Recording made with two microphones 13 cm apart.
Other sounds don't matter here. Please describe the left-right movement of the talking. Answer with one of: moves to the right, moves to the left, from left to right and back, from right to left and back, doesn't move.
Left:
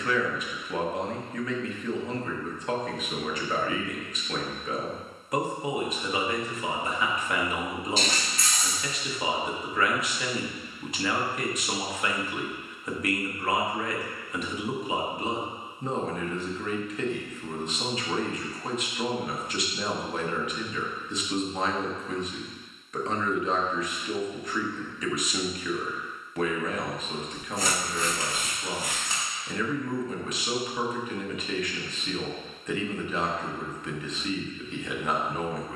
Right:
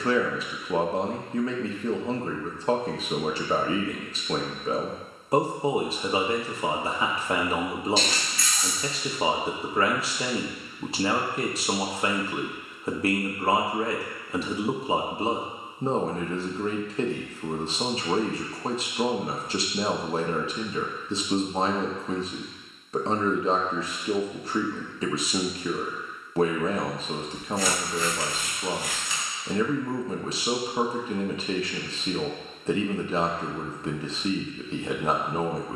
doesn't move.